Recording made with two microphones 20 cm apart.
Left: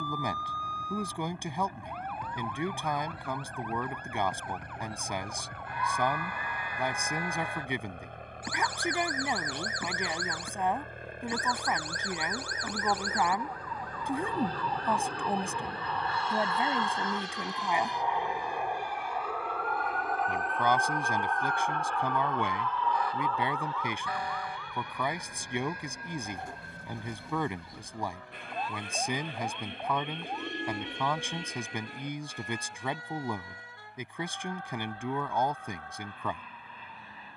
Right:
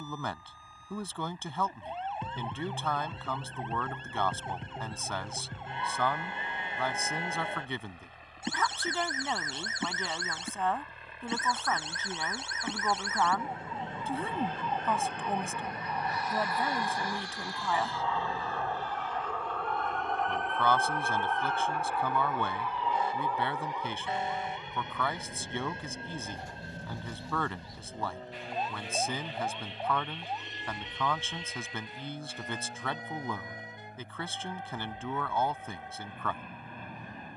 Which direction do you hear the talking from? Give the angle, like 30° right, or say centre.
10° left.